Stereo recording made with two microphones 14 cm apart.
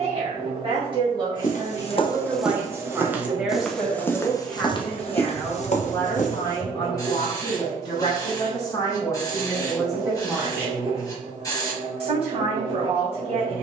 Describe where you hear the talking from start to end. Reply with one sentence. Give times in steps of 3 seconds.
In this clip you hear the talking on the right from 0 s, in the centre from 3 s, on the left from 6 s, in the centre from 9 s and on the right from 12 s.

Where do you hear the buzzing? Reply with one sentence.
In this clip you hear the buzzing on the right.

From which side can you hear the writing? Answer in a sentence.
You can hear the writing on the left.